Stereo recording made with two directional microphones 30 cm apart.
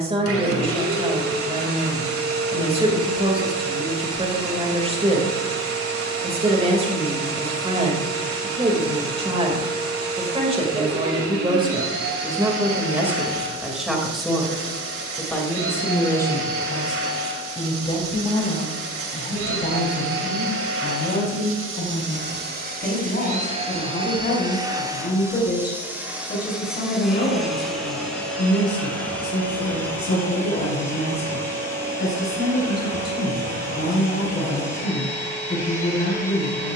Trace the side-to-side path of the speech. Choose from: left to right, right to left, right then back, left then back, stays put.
right to left.